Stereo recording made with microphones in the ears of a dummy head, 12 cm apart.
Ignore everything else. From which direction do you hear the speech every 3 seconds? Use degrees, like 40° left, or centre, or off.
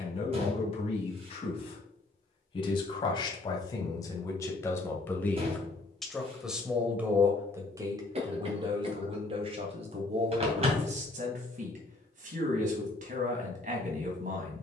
40° left, 20° left, 20° right, 50° right, 60° right.